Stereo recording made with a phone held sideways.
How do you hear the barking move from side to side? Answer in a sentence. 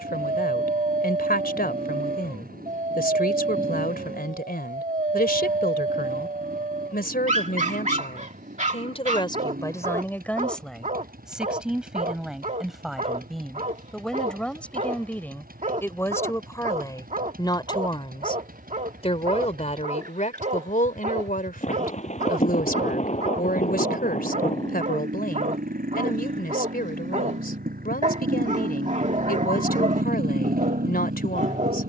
You can hear the barking stay in one place.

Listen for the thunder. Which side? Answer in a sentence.
In this clip you hear the thunder on the left.